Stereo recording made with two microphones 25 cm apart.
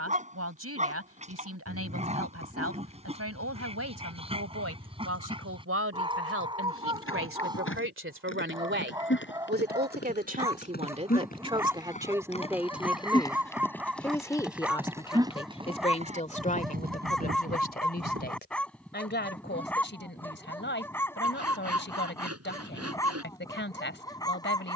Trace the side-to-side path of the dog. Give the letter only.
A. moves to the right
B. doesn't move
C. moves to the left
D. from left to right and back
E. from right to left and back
C.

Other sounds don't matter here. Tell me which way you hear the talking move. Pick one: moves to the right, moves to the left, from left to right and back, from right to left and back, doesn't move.
moves to the left.